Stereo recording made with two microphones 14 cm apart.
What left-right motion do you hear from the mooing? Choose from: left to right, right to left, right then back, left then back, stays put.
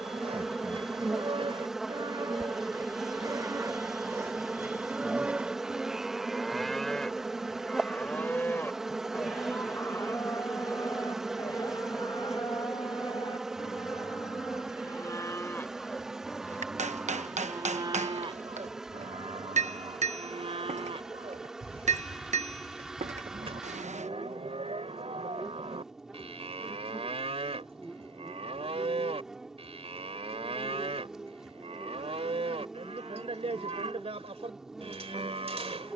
left then back.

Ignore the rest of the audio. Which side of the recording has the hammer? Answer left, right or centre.
right.